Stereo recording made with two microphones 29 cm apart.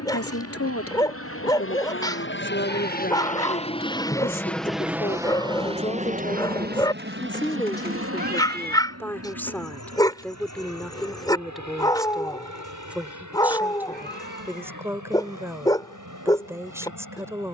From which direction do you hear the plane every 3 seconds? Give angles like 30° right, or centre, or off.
50° left, centre, 40° right, 60° right, 60° right, 70° right.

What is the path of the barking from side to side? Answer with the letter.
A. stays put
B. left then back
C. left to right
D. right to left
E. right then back
A.